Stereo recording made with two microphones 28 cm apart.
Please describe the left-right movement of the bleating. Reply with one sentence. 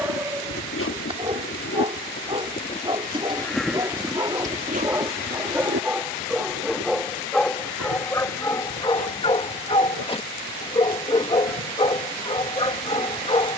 You can hear the bleating move to the right.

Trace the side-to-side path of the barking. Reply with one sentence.
In this clip you hear the barking move from right to left.